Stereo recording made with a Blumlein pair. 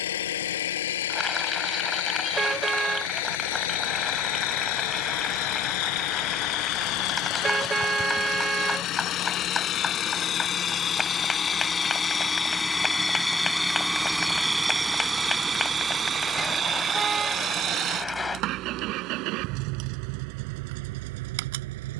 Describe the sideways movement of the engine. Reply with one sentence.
You can hear the engine move from left to right.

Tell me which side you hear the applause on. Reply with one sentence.
You can hear the applause in the centre.